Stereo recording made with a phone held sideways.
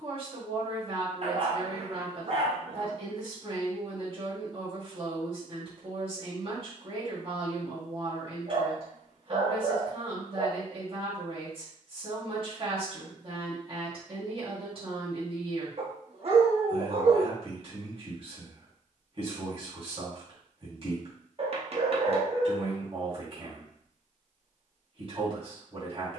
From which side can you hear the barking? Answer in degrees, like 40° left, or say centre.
50° right.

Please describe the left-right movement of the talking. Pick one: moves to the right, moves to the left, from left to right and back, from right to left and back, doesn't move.
doesn't move.